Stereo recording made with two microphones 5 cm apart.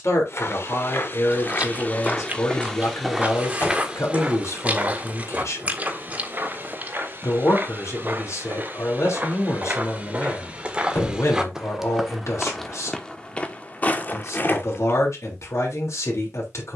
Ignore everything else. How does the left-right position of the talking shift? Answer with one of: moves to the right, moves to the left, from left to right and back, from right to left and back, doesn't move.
doesn't move.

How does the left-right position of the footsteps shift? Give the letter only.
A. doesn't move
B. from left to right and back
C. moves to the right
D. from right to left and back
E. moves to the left
B.